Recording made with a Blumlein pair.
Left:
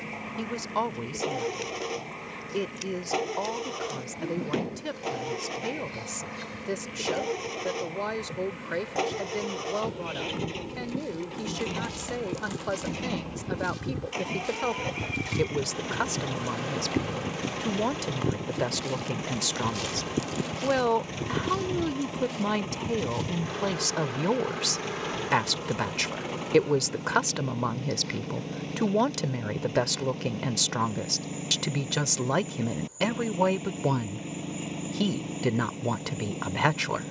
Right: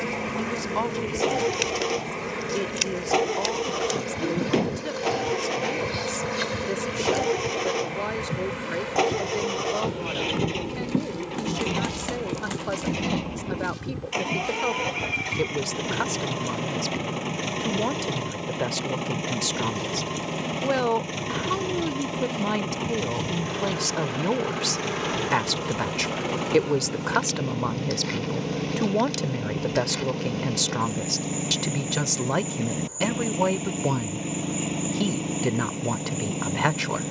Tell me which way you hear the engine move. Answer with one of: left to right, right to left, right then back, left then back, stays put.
stays put.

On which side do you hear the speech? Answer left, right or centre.
centre.